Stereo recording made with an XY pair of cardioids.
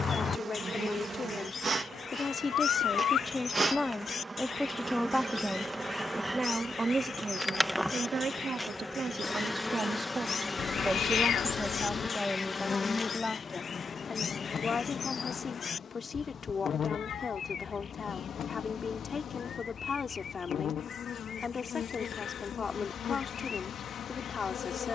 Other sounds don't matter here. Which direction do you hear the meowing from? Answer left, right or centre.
left.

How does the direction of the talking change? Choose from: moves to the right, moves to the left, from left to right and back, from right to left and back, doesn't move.
from left to right and back.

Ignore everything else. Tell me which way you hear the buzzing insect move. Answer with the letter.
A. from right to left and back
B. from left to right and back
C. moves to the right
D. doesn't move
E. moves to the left
E.